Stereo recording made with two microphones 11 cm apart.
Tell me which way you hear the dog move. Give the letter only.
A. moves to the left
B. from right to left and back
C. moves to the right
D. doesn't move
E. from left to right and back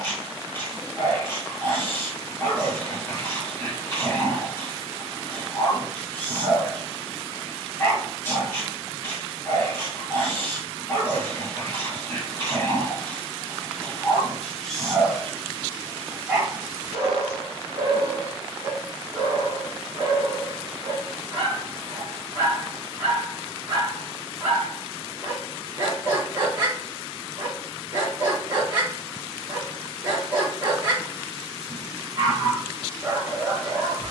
C.